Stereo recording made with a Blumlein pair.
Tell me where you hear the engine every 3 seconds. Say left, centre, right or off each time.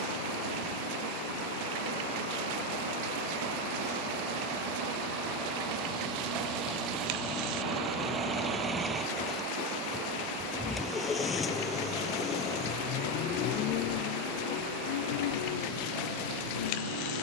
right, right, right, centre, left, left.